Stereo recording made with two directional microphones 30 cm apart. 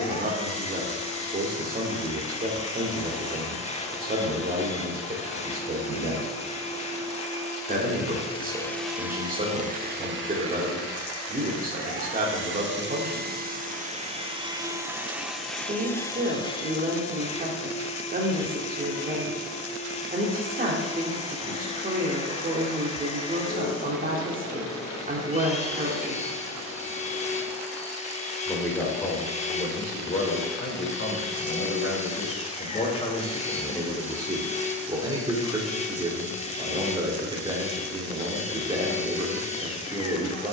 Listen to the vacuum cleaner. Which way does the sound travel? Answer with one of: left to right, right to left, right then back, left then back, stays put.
right then back.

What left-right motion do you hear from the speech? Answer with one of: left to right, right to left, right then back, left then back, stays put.
left then back.